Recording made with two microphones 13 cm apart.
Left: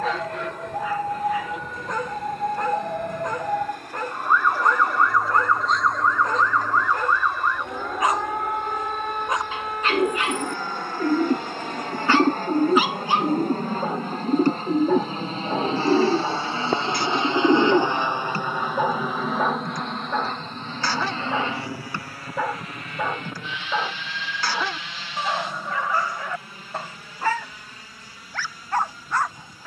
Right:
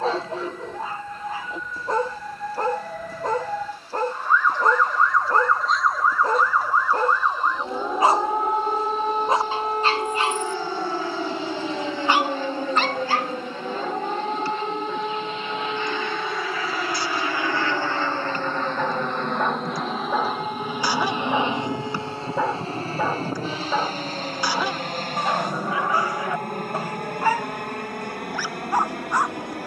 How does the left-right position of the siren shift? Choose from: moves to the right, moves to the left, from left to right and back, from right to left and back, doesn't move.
moves to the right.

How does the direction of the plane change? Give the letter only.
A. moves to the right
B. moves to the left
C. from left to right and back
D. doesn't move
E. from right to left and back
A.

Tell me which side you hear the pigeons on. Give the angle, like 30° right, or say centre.
60° left.